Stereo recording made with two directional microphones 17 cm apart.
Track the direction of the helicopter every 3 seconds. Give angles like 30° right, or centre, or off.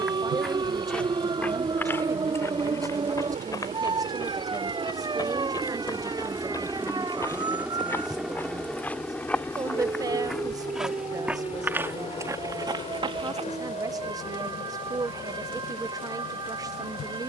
50° right, 40° right, 10° right, 20° left, 40° left, 50° left.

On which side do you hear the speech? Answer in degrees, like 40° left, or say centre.
20° right.